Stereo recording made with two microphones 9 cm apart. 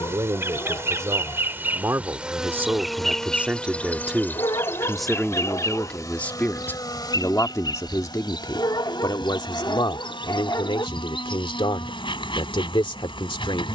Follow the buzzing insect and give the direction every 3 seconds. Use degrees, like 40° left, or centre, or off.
20° right, 20° left, 50° left, 60° left, 60° left.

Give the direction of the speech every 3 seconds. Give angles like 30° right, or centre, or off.
30° right, centre, 30° left, 50° left, 60° left.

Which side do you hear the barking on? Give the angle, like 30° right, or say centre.
40° left.